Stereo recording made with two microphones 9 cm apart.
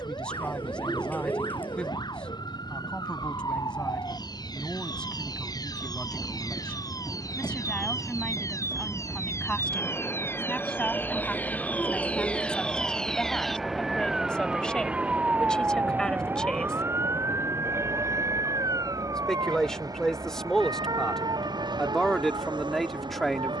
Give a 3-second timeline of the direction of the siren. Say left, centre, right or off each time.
left, left, left, left, centre, right, right, right.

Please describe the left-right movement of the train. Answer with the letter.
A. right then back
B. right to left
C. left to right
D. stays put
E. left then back
C.